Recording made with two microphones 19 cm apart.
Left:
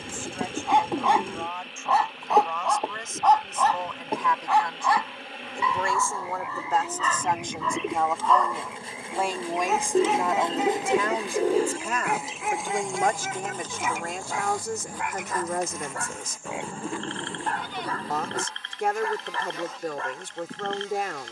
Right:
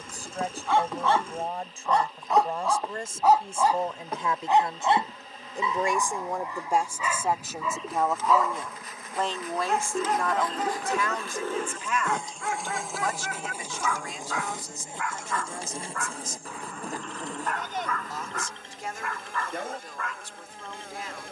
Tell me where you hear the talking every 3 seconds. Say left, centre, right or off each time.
right, right, centre, left, left, left, left.